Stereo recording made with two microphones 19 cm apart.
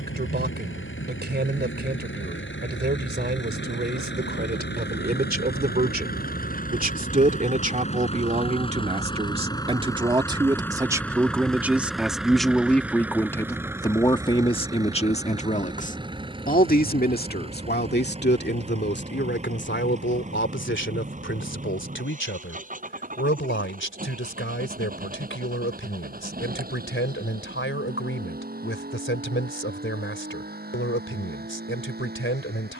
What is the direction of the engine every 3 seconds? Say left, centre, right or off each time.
left, left, left, centre, centre, right, right, right, right, right, right.